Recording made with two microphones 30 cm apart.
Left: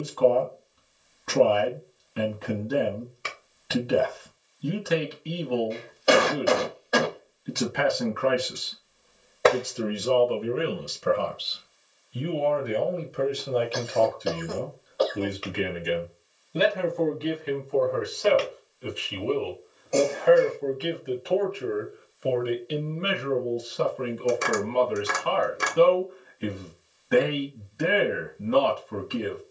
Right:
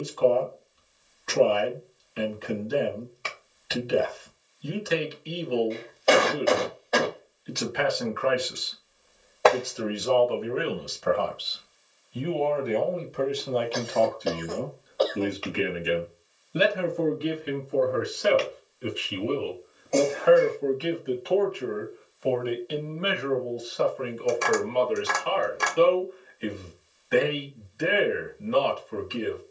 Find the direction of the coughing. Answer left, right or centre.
centre.